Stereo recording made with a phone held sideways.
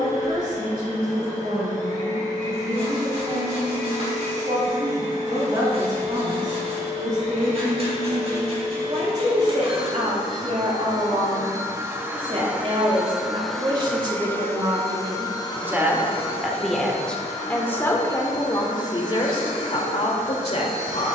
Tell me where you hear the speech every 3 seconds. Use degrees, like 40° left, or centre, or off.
70° right, 60° right, 60° right, 50° right, 30° right, centre, 40° left.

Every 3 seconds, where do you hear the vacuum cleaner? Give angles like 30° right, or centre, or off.
60° right, 60° right, 50° right, 30° right, centre, 40° left, 60° left.